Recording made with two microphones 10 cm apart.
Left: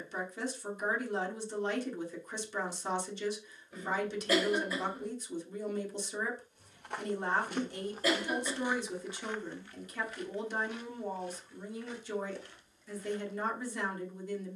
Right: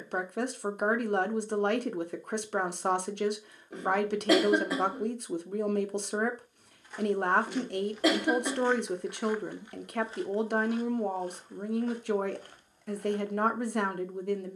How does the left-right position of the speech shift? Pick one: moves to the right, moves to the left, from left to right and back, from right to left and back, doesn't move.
doesn't move.